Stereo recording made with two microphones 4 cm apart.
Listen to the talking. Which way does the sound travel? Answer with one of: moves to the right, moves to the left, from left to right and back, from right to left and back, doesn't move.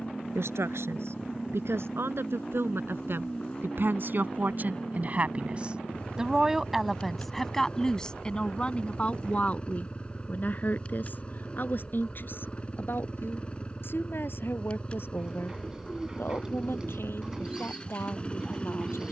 moves to the left.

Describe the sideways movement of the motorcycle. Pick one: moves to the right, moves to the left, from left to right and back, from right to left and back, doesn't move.
doesn't move.